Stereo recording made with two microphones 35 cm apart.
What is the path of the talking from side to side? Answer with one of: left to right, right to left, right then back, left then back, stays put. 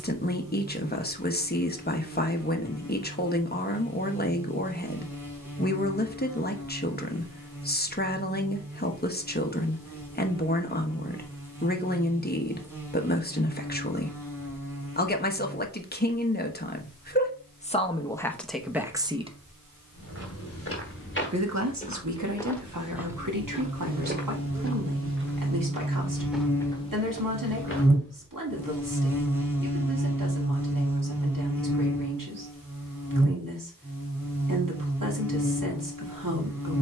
left to right.